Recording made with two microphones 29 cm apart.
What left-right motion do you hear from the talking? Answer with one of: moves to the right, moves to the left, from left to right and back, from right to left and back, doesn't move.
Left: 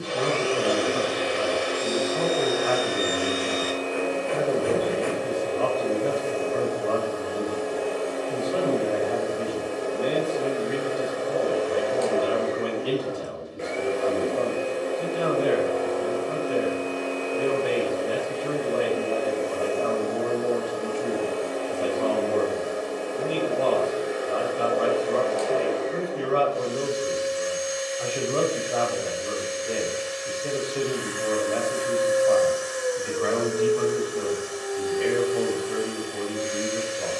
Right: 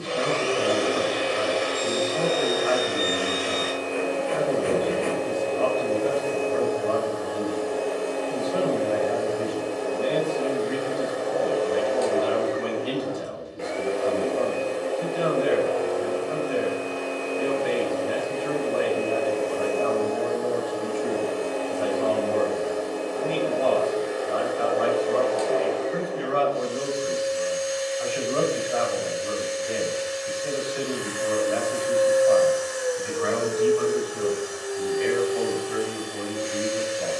doesn't move.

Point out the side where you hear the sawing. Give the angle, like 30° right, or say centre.
50° left.